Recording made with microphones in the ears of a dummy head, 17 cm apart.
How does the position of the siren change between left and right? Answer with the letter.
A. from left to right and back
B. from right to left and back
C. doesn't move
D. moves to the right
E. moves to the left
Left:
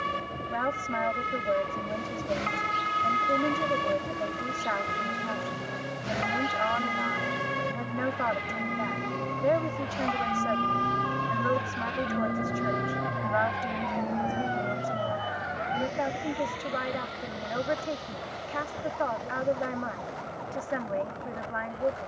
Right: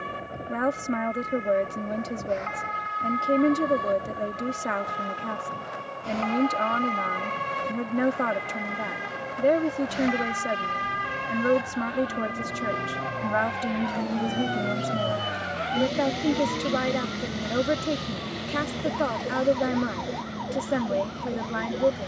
D.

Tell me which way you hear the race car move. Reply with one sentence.
In this clip you hear the race car travel towards the right.